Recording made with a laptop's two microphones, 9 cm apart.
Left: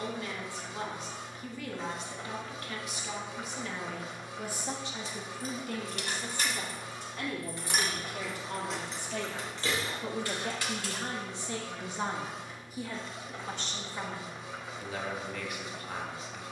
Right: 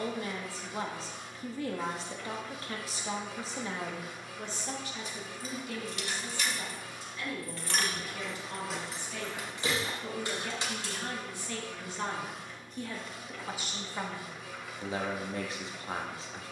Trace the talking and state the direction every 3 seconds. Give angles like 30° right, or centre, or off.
30° right, 10° left, 50° left, 30° left, centre, 30° right.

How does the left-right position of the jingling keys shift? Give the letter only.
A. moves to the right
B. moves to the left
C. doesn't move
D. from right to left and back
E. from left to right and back
A.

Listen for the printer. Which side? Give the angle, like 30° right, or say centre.
30° left.